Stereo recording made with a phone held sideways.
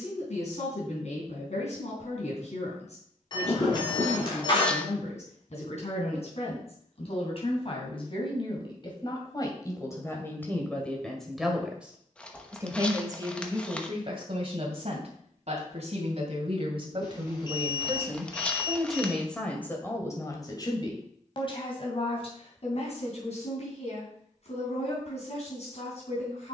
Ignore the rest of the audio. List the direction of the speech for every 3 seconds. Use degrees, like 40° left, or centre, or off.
60° left, 60° left, 50° left, 10° left, 40° right, 40° right, 10° left, 50° left, 60° left.